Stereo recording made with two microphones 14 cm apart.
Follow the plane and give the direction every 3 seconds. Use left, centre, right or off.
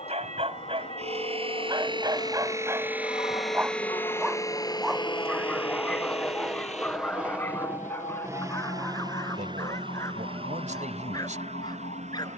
left, left, centre, right.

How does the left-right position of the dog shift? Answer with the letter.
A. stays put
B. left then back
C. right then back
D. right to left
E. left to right
D.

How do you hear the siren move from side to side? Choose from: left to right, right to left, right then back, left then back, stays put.
right to left.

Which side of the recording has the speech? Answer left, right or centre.
right.